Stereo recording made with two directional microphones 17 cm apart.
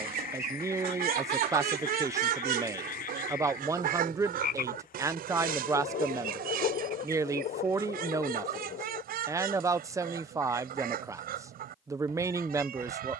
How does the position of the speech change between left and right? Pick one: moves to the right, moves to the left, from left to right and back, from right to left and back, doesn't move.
doesn't move.